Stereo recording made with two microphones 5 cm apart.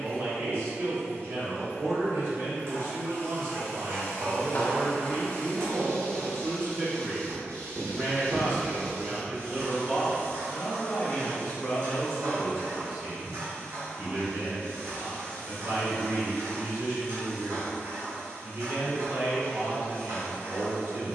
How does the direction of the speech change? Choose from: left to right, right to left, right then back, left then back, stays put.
left then back.